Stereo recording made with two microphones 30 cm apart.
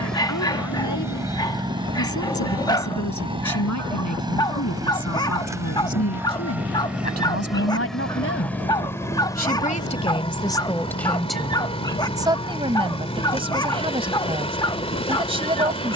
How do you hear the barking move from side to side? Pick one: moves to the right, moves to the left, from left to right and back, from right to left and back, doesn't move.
doesn't move.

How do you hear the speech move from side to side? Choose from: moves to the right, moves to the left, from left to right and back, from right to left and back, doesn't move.
moves to the right.